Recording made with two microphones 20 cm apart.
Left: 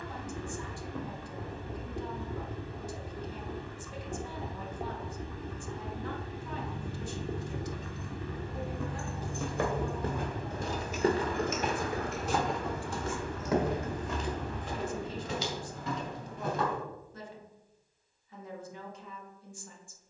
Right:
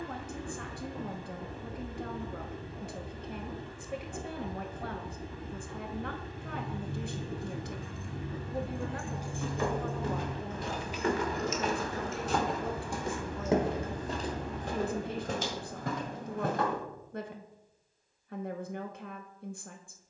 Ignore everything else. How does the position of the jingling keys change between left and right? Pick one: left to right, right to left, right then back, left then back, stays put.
right to left.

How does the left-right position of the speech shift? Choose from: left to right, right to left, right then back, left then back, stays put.
stays put.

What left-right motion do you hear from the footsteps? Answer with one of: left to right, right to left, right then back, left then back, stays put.
left to right.